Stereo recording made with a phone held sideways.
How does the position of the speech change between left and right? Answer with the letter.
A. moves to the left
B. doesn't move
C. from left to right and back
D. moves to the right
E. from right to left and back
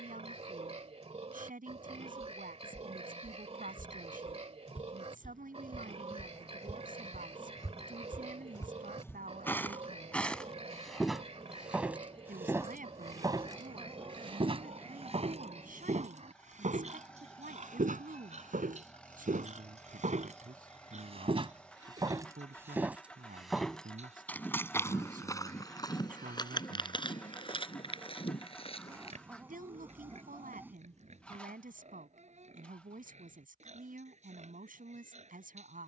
B.